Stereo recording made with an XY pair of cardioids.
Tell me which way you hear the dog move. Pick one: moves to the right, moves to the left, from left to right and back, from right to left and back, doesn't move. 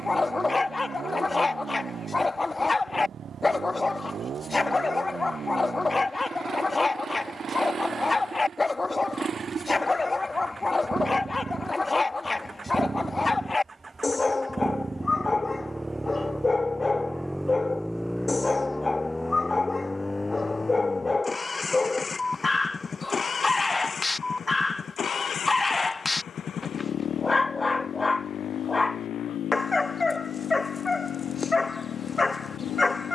doesn't move.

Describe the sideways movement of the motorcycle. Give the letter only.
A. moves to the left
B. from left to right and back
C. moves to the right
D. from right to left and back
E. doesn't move
A.